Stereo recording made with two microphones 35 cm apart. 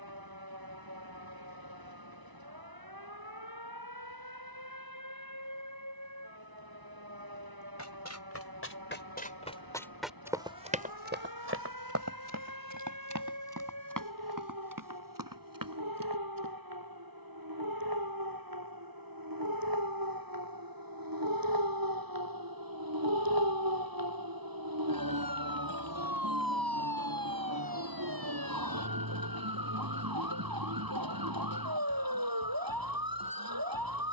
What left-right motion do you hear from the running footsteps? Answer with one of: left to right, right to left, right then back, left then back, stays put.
left to right.